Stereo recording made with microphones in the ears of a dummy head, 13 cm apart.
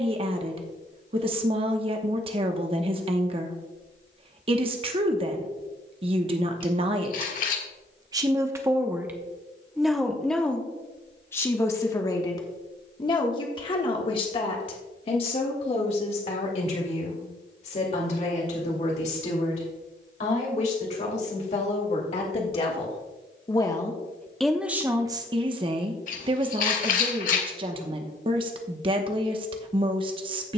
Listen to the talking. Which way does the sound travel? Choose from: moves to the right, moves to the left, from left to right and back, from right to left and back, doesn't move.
from right to left and back.